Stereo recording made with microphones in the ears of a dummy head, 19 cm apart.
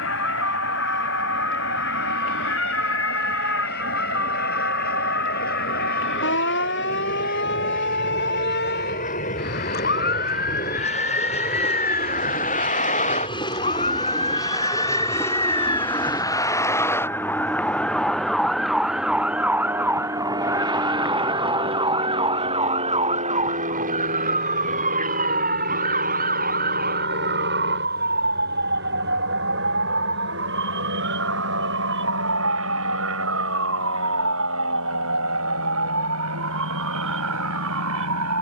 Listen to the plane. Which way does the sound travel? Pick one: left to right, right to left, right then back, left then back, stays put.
left to right.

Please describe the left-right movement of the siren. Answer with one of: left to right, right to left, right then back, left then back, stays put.
left to right.